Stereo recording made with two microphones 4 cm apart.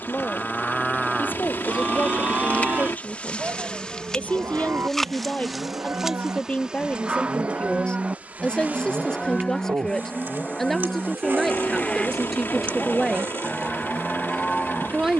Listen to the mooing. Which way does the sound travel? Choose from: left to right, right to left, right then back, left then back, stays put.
right then back.